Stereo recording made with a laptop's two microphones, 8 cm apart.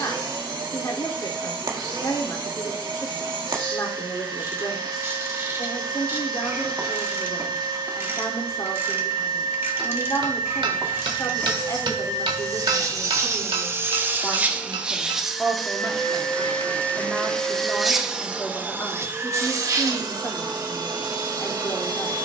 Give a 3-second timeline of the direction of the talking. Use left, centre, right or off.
left, left, left, left, left, centre, left, left.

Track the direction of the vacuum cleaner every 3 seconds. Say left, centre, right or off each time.
right, right, right, right, right, centre, right, right.